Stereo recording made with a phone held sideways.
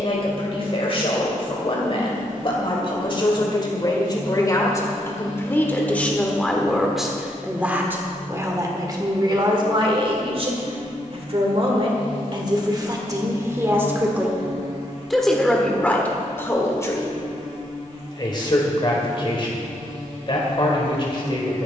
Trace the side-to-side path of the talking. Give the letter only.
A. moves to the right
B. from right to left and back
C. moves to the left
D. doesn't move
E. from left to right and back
E.